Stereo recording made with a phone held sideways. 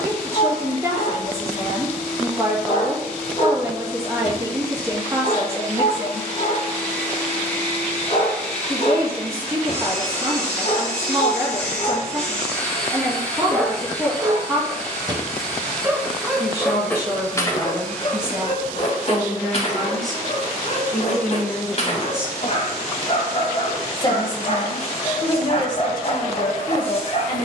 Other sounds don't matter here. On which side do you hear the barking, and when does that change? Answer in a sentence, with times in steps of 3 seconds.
You can hear the barking on the left from 0 s, in the centre from 12 s and on the left from 18 s.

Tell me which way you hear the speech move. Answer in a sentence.
In this clip you hear the speech move to the left.